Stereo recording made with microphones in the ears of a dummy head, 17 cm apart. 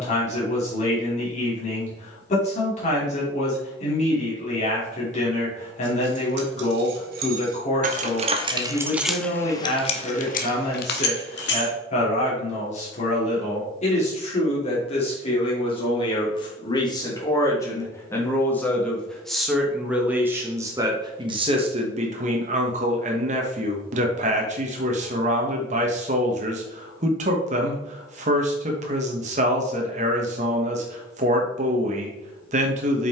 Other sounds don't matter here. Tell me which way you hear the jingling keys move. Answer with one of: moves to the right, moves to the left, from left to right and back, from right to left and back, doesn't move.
moves to the left.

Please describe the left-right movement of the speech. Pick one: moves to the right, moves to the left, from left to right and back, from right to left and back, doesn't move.
moves to the right.